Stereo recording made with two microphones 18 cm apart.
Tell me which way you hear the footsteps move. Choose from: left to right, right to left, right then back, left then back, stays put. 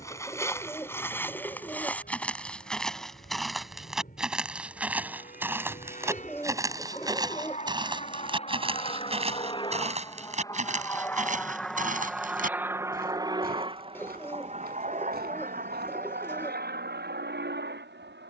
left to right.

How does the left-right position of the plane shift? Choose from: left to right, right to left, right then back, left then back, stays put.
left to right.